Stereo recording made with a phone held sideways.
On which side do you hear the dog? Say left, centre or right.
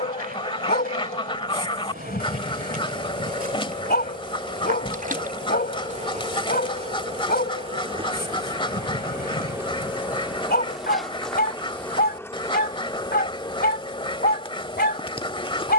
left.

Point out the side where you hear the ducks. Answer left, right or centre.
left.